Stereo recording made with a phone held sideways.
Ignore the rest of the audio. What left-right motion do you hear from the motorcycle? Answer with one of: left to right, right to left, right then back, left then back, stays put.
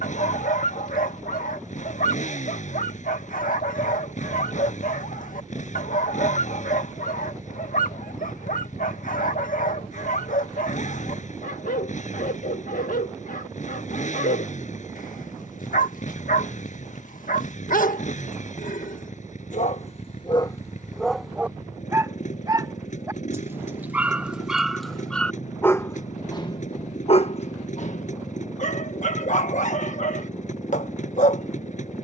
stays put.